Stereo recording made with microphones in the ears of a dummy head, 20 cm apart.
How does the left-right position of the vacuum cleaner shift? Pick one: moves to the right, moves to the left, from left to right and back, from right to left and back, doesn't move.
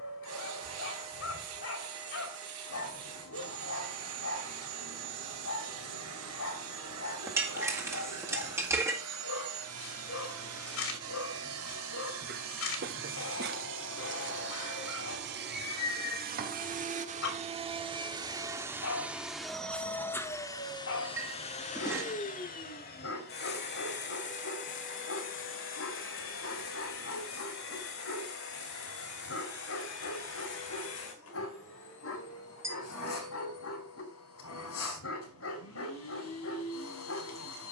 moves to the left.